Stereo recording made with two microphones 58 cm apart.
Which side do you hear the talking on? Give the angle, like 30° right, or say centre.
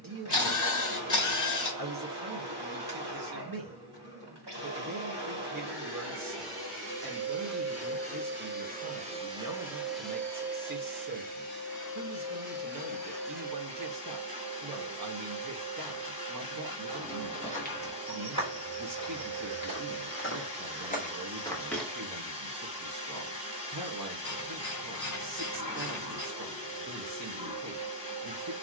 40° right.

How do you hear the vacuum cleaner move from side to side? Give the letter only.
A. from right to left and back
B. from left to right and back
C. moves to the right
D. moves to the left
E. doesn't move
D.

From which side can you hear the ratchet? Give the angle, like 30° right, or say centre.
30° left.